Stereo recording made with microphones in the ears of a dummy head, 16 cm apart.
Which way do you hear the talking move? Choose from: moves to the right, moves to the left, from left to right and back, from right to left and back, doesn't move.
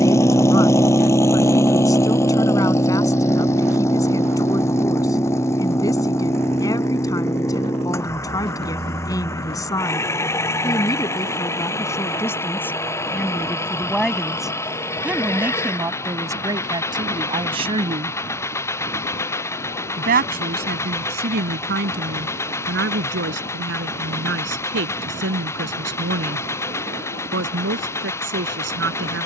moves to the right.